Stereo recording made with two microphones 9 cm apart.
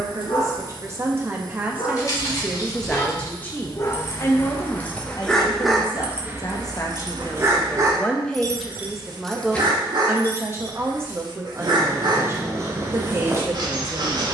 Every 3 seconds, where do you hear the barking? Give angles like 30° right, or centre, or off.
60° left, 20° left, 40° right, 50° right, 50° right.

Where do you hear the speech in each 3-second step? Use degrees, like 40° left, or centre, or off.
20° right, 40° left, 20° left, 20° right, 30° right.